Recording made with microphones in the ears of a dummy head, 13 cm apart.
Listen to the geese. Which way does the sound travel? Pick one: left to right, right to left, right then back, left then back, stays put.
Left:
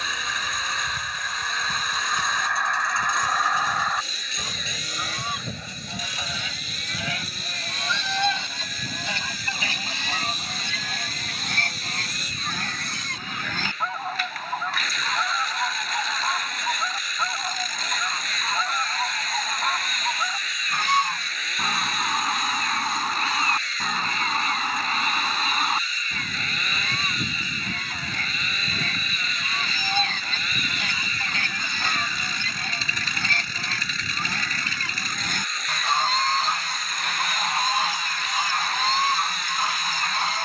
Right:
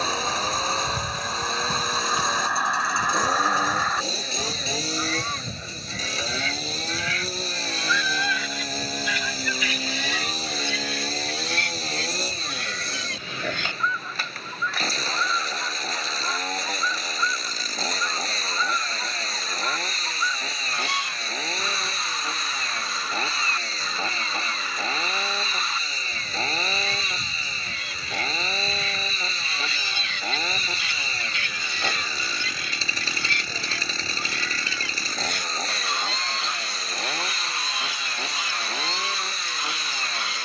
right to left.